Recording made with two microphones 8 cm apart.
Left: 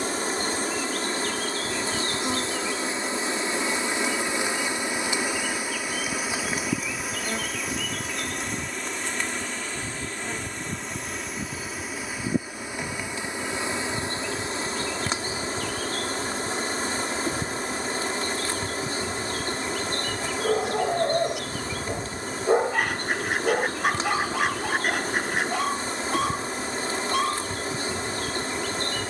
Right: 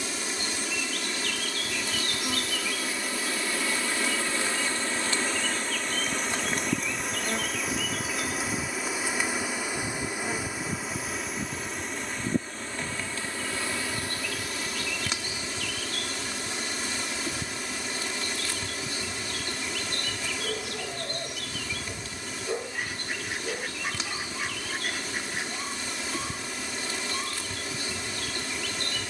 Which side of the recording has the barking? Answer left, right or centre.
left.